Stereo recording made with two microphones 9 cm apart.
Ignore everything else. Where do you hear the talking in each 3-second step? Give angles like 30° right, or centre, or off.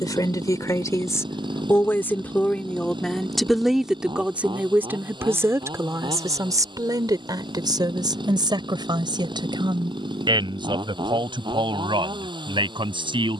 30° left, 20° right, 50° right, 60° right, 70° right.